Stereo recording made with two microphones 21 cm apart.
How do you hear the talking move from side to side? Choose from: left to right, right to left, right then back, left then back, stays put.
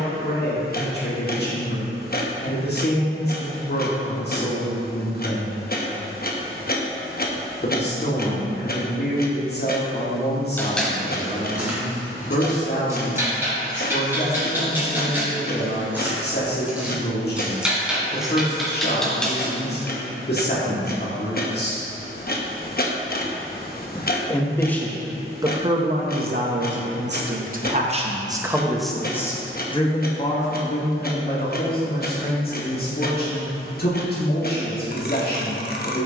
right then back.